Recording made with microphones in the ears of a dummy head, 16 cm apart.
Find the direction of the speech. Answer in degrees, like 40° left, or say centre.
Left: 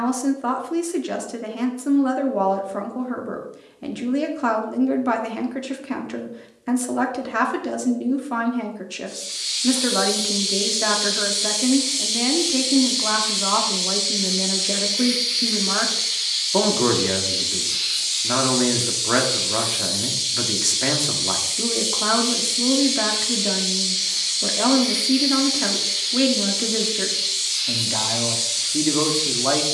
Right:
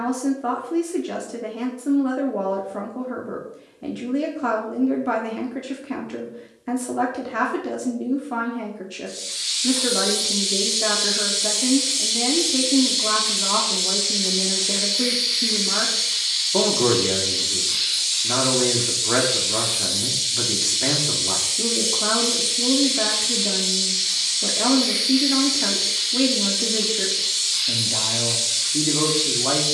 20° left.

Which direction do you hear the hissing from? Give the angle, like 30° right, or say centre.
10° right.